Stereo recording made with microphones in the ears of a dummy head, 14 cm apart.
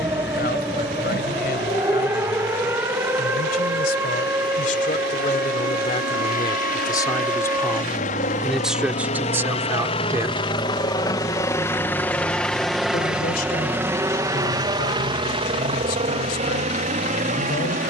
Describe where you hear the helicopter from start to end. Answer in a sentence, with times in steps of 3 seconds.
In this clip you hear the helicopter on the left from 0 s, in the centre from 12 s and on the right from 15 s.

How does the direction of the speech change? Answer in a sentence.
In this clip you hear the speech move from left to right and back again.